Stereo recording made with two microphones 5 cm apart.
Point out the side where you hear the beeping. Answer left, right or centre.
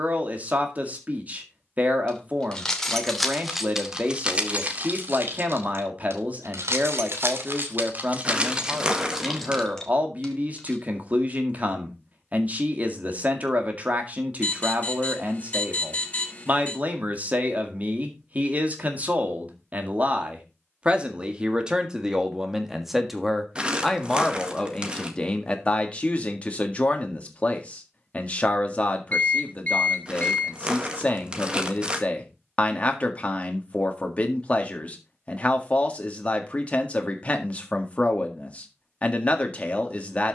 left.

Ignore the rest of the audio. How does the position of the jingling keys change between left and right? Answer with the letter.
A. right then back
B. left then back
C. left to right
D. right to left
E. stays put
A.